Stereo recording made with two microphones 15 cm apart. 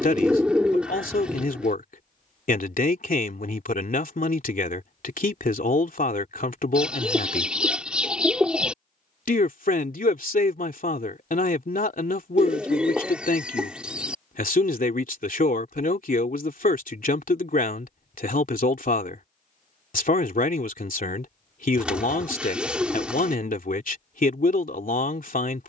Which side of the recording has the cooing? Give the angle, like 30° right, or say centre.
10° right.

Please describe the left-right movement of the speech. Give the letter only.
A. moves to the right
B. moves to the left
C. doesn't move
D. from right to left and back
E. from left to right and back
C.